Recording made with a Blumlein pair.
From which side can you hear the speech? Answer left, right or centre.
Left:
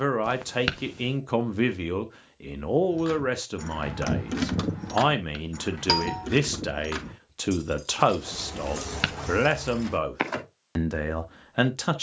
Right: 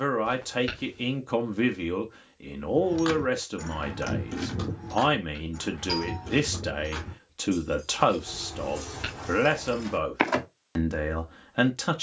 centre.